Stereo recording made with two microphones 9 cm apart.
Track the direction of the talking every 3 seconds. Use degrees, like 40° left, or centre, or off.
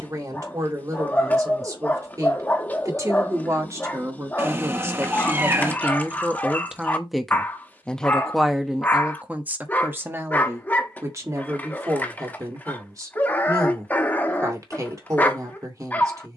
40° right, 30° right, centre, 30° right, 40° right, 40° right.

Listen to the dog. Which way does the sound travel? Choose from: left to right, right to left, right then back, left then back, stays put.
stays put.